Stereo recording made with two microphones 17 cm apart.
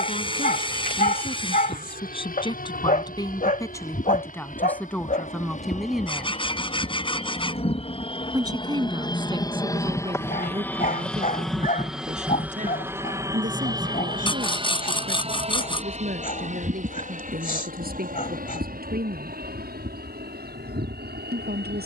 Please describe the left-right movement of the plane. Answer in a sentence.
In this clip you hear the plane move to the right.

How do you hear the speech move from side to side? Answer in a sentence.
In this clip you hear the speech move to the right.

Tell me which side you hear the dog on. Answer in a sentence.
In this clip you hear the dog on the left.